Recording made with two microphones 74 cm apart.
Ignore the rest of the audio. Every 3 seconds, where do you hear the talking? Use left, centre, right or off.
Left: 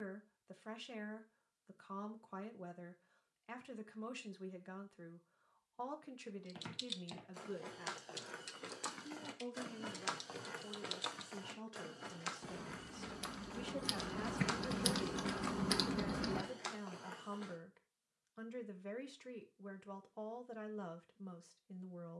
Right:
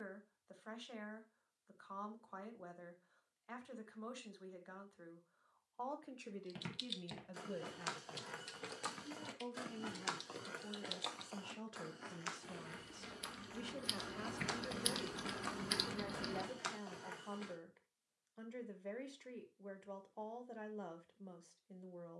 left, left, centre, right, centre, left, left, left.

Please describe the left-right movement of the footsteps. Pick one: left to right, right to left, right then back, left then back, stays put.
left then back.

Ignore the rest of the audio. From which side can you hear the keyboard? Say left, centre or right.
left.